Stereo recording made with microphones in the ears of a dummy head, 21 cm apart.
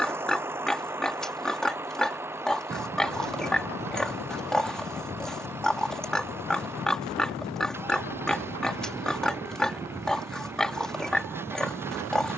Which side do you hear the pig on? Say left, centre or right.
centre.